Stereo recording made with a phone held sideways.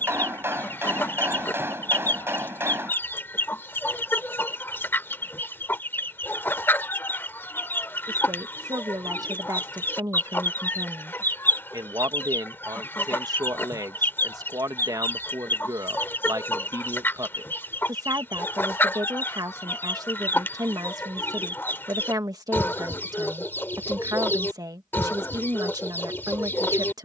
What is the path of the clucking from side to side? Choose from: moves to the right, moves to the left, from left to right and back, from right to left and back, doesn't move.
doesn't move.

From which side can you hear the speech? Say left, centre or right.
right.